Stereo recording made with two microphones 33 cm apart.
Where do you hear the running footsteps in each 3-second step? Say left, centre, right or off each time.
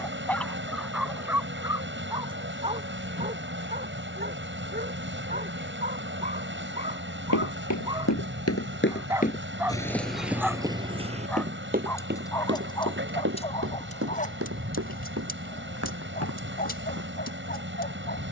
off, off, left, centre, right, right.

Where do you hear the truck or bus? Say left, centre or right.
right.